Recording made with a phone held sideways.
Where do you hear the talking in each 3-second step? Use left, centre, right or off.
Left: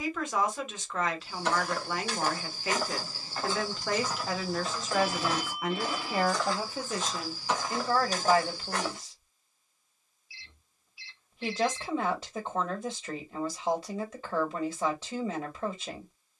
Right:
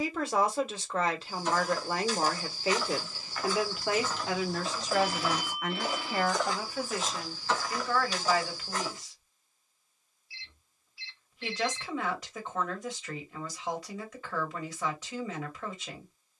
right, centre, left, left, left, left.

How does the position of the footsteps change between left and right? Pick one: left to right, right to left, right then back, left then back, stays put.
right then back.